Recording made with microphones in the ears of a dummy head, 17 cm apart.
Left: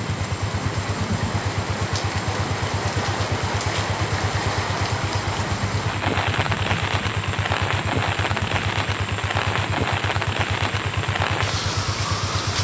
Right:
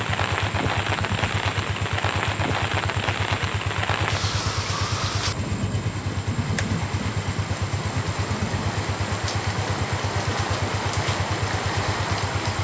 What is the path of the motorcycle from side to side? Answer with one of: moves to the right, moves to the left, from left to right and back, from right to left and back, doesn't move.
doesn't move.